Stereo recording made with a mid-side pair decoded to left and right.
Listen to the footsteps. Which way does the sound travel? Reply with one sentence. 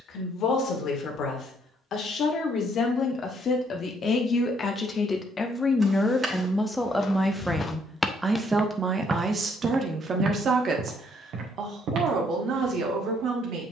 In this clip you hear the footsteps go from the left side to the right.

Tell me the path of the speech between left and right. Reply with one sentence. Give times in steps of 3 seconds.
You can hear the speech on the left from 0 s, in the centre from 6 s and on the right from 9 s.